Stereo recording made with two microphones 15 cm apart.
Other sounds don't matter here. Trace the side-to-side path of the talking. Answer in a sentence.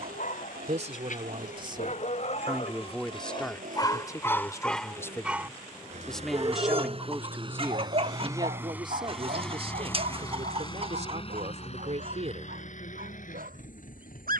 In this clip you hear the talking move from right to left and back again.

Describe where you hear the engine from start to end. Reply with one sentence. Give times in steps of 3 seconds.
In this clip you hear the engine on the right from 0 s and on the left from 9 s.